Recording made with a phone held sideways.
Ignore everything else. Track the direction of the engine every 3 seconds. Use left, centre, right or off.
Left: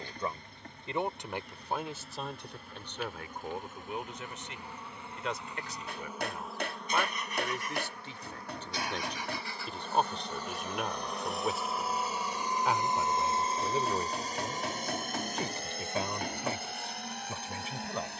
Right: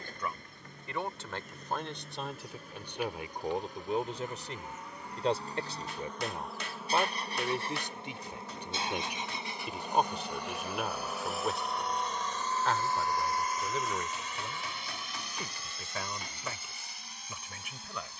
right, right, right, centre, left, left.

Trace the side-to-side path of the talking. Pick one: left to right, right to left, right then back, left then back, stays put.
right then back.